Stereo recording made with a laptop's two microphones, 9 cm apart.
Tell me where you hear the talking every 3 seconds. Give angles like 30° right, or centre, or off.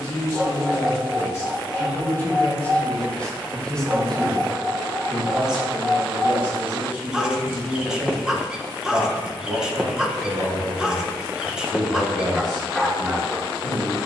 30° left, centre, 20° right, 40° right, 50° right.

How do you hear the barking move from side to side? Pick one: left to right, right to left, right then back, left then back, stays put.
stays put.